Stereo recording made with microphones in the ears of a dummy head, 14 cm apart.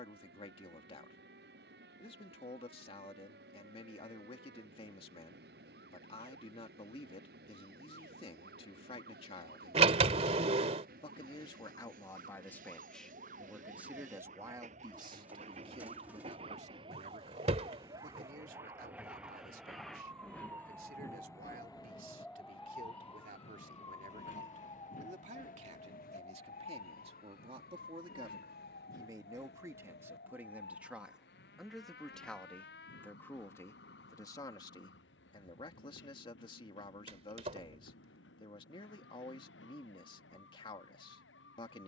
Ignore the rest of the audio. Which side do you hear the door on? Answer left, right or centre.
right.